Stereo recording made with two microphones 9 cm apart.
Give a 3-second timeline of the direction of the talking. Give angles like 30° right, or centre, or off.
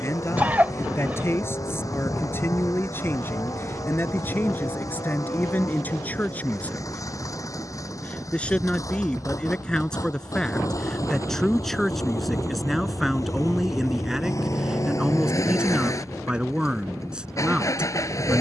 30° left, 20° left, 20° left, 10° left, centre, 10° right.